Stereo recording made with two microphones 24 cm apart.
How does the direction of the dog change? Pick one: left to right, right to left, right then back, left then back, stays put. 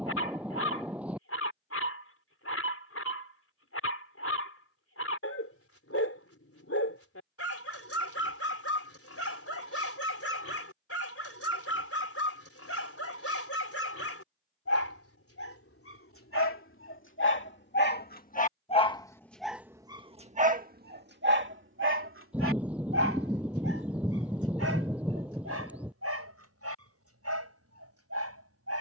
left to right.